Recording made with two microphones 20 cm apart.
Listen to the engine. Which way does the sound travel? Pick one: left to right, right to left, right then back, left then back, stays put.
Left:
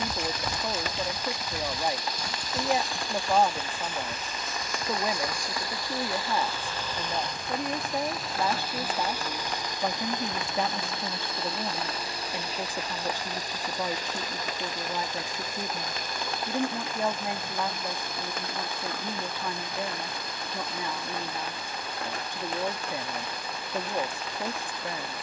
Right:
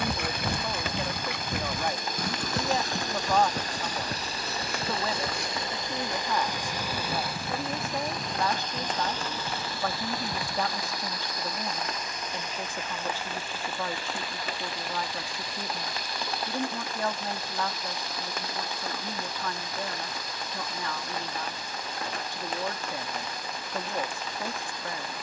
right to left.